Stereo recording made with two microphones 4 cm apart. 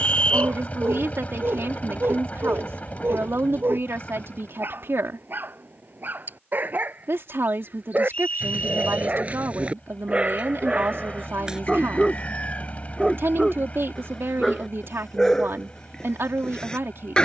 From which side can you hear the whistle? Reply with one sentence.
You can hear the whistle on the left.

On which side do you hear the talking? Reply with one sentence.
You can hear the talking on the right.